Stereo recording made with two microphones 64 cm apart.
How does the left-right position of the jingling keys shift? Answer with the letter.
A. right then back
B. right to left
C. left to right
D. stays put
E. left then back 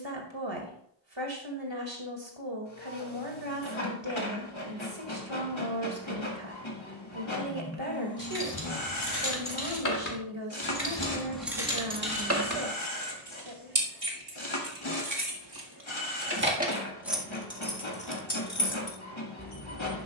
A.